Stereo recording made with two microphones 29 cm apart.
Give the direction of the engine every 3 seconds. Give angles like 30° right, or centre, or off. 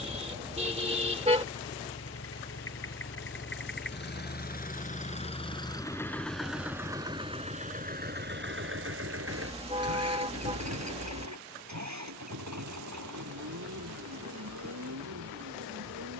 50° left, 30° left, 20° right, 60° right, 80° right, 80° right.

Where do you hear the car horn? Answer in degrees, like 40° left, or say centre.
20° right.